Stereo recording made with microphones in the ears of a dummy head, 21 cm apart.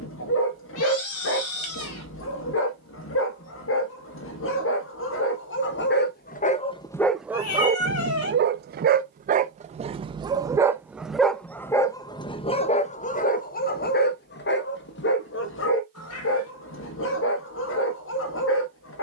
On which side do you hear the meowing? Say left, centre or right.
left.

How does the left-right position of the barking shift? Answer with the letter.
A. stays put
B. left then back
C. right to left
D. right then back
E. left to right
D.